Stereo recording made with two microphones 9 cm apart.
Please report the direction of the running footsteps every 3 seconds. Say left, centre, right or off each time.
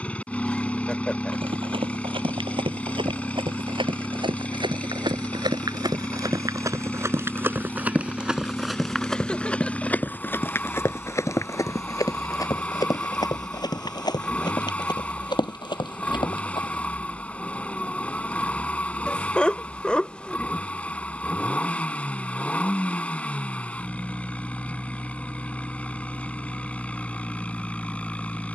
right, right, right, left, left, left, off, off, off, off.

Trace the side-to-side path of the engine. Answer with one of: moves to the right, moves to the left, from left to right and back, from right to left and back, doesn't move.
doesn't move.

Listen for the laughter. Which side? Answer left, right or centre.
centre.